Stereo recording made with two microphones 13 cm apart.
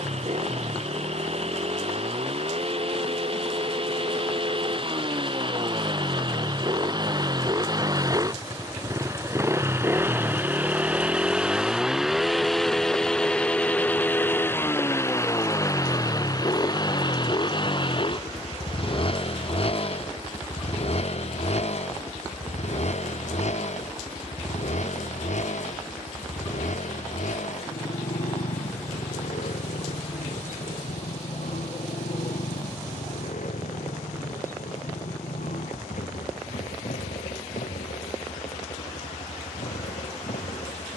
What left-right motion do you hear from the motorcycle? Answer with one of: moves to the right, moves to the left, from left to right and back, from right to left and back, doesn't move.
moves to the left.